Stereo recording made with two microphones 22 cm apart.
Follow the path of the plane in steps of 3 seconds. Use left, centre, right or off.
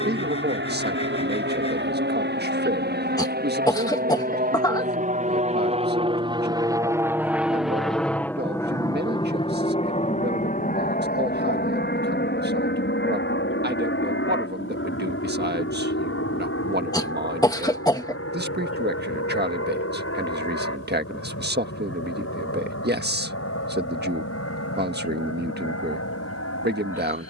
right, right, centre, left, left, left, left, left, left.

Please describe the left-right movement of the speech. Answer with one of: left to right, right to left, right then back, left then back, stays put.
stays put.